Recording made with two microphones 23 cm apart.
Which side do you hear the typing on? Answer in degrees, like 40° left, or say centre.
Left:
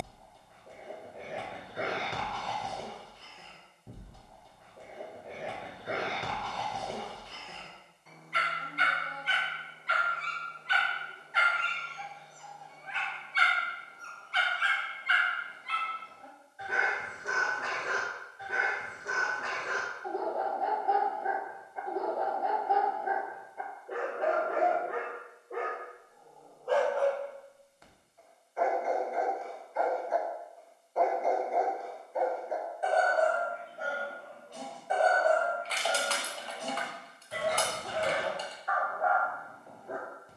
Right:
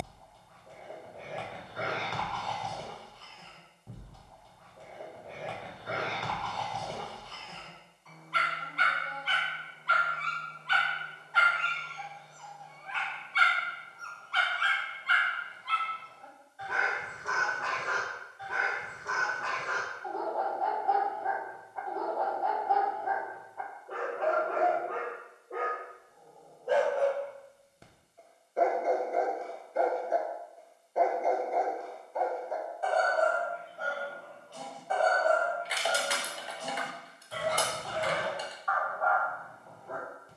10° right.